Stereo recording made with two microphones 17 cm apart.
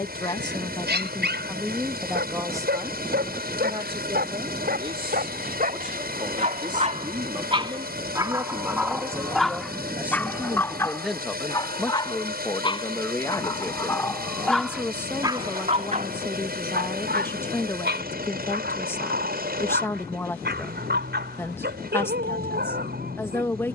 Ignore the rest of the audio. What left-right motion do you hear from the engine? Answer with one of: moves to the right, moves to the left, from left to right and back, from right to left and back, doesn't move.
doesn't move.